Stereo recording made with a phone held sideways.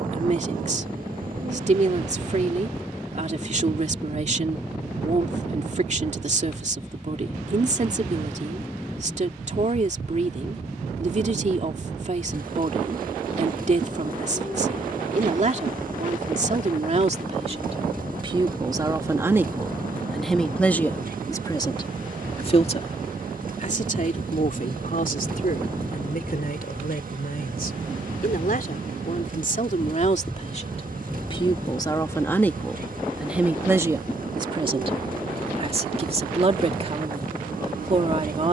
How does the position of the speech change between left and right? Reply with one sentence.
You can hear the speech move from right to left and back again.